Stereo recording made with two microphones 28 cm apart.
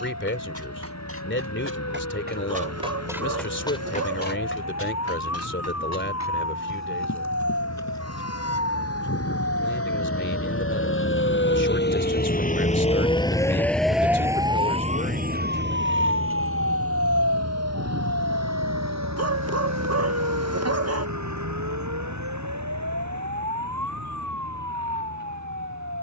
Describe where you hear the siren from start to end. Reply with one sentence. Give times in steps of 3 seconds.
You can hear the siren on the left from 0 s, in the centre from 12 s and on the right from 15 s.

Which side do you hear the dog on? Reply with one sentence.
In this clip you hear the dog on the right.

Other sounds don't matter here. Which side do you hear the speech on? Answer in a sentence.
In this clip you hear the speech on the left.